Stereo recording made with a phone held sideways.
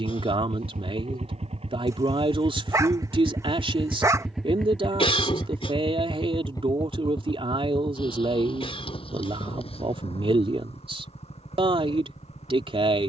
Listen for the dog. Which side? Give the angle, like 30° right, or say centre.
20° right.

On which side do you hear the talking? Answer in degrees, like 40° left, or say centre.
40° right.